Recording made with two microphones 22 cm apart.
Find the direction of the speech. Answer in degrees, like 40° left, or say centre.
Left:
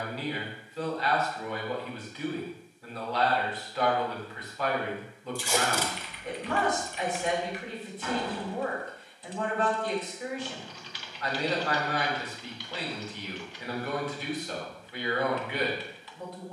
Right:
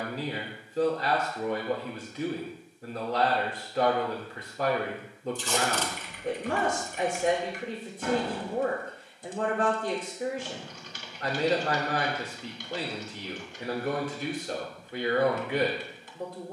50° right.